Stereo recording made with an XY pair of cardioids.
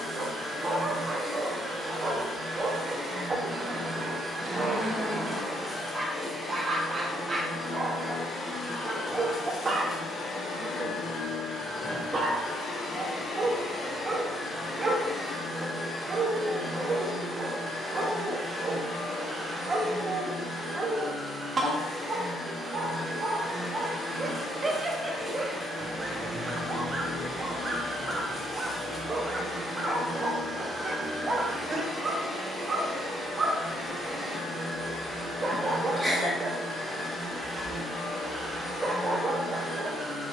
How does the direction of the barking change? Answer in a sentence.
You can hear the barking stay in one place.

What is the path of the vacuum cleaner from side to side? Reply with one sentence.
In this clip you hear the vacuum cleaner go left and come back.